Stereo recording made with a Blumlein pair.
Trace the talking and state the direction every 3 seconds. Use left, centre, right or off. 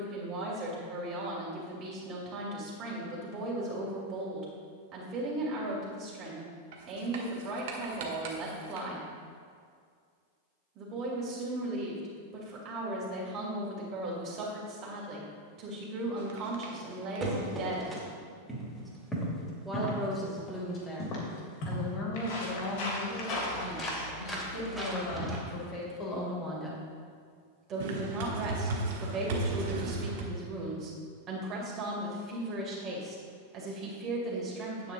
right, right, right, right, right, right, centre, left, left, right, right, right.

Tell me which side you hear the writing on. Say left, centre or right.
right.